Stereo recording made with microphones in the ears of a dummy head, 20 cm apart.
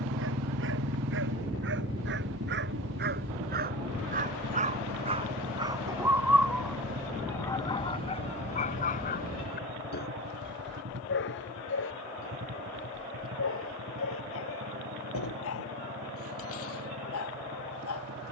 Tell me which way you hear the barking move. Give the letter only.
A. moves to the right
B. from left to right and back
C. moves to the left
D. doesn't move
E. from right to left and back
C.